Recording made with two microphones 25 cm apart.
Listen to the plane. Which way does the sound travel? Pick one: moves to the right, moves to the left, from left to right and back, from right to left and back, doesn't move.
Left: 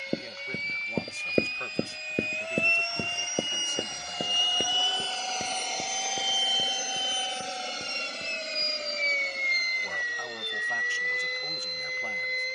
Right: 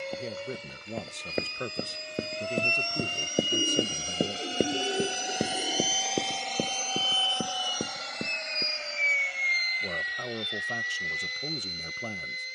moves to the left.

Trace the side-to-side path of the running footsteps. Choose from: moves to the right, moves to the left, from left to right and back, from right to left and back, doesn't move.
moves to the right.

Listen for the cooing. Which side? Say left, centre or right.
right.